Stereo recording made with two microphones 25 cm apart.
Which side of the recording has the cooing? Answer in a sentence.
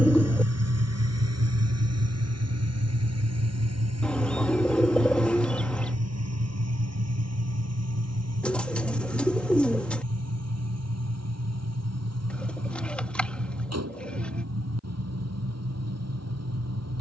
In this clip you hear the cooing in the centre.